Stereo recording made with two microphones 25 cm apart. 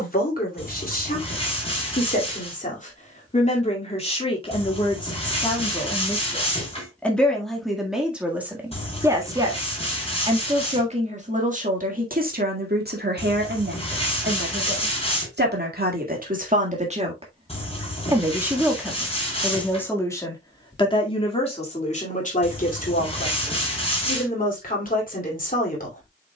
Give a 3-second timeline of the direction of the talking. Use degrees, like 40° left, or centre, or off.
40° left, 20° left, centre, 20° right, 50° right, 30° right, centre, 30° left, 40° left.